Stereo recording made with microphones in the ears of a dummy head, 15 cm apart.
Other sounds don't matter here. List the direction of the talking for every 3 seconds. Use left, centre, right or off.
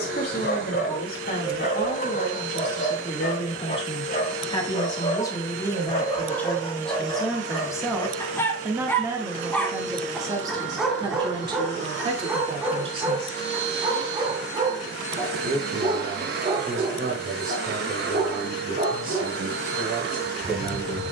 left, left, centre, right, right, right, right.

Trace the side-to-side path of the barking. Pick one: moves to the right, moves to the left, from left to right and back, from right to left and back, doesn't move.
moves to the right.